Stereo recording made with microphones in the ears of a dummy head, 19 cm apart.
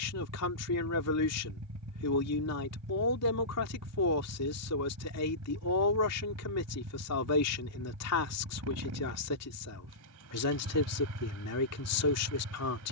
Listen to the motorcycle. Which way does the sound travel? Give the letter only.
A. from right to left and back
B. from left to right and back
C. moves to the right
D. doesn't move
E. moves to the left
D.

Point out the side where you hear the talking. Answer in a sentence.
In this clip you hear the talking on the left.